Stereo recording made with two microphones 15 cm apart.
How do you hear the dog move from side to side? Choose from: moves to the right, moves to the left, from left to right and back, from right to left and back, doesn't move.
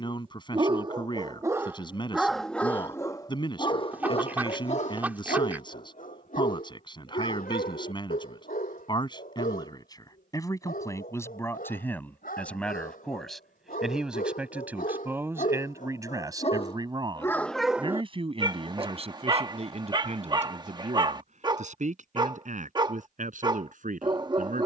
from right to left and back.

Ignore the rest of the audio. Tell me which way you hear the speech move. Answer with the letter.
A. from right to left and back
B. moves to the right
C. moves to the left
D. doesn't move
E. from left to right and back
B.